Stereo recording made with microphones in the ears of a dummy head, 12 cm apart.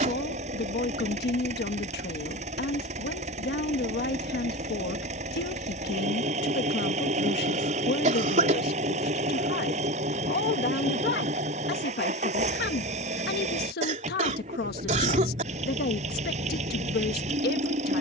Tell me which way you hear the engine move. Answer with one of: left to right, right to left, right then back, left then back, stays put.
stays put.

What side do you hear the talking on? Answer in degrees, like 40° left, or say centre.
80° left.